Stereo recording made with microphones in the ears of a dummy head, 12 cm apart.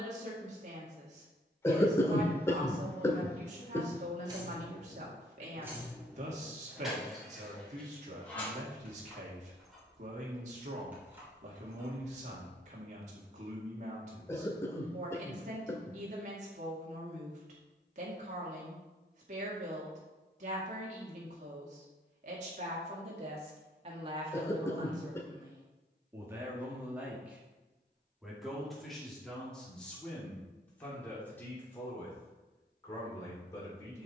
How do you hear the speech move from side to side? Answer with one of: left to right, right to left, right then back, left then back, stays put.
right to left.